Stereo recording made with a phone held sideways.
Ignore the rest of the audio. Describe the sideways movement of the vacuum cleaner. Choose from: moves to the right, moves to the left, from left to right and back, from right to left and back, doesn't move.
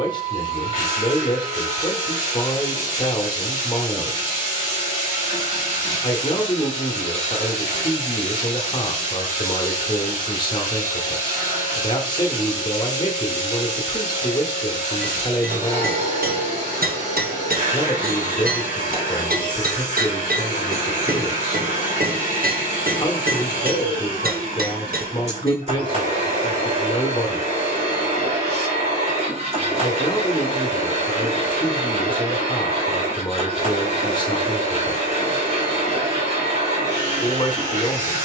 doesn't move.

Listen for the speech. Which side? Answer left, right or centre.
left.